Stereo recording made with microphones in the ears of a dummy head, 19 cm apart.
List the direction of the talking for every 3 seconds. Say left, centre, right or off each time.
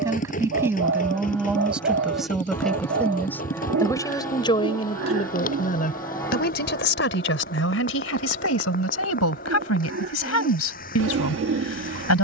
centre, left, left, left.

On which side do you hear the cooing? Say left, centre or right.
right.